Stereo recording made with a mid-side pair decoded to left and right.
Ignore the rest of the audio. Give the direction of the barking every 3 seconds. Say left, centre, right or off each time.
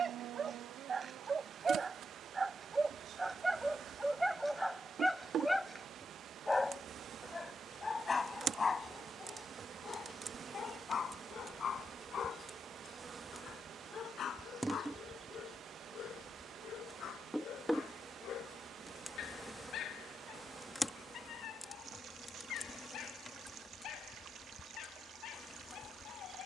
right, centre, left, left, left, left, left, left, left.